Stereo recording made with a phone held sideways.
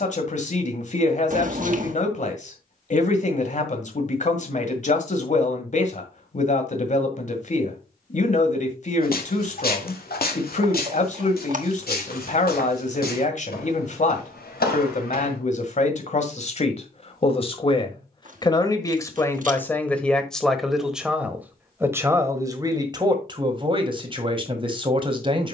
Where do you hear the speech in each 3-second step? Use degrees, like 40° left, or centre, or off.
50° left, 50° left, 50° left, 50° left, 50° left, 40° left, 10° left, 20° right, 30° right.